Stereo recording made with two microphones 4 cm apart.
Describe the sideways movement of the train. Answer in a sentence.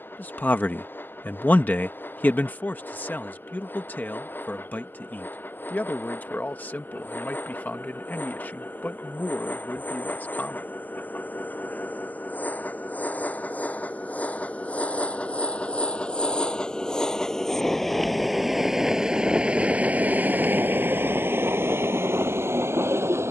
You can hear the train travel towards the right.